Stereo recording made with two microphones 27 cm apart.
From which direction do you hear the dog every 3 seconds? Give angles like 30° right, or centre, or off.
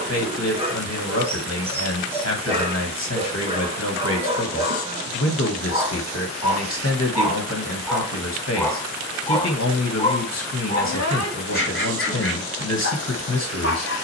20° right, 20° right, 10° right, 30° left, 60° left.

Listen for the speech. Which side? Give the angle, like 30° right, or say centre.
70° left.